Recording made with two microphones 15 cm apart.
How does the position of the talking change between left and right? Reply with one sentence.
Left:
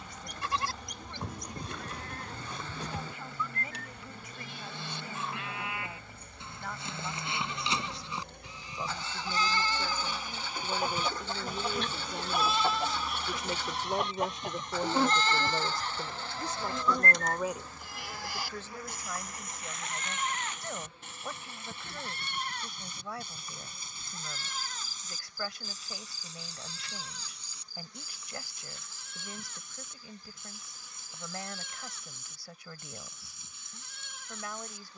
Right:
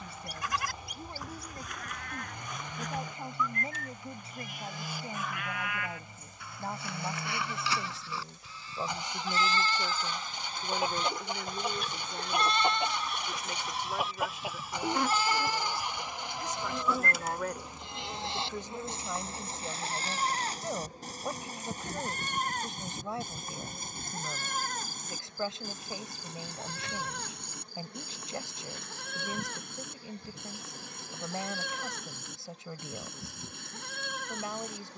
You can hear the talking go left and come back.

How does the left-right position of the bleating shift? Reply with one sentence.
In this clip you hear the bleating move from left to right.